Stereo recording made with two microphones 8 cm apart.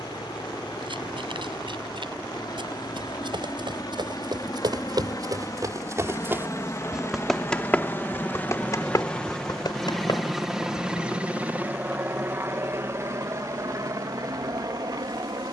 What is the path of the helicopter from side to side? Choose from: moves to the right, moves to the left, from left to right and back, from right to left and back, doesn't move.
moves to the right.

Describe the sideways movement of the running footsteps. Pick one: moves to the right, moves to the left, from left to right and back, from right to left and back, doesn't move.
moves to the left.